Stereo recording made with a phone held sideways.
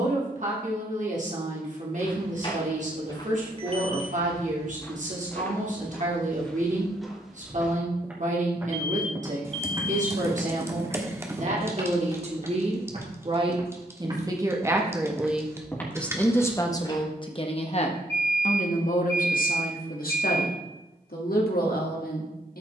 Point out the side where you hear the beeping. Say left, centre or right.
right.